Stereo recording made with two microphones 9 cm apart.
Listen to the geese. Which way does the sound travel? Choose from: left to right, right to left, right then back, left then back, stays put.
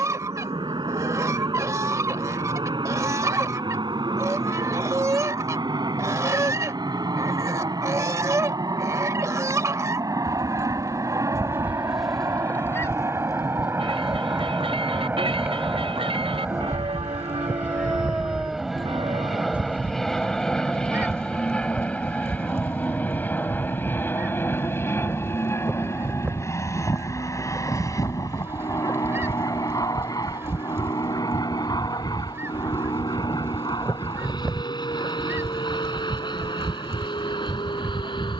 left then back.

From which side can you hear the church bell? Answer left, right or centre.
right.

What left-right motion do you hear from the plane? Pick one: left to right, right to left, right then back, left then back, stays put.
right to left.